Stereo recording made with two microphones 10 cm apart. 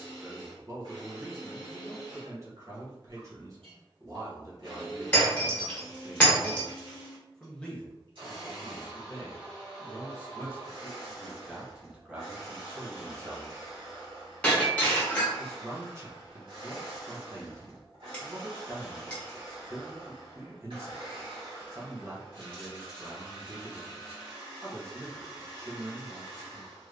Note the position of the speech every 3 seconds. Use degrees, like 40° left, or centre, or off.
40° right, 30° right, 10° left, 10° left, 30° right, 30° right, 30° right, 30° right, 30° right.